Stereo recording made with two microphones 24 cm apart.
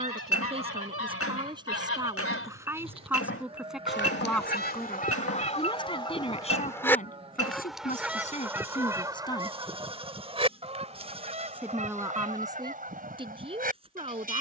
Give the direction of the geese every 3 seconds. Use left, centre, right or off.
left, left, centre, right, right.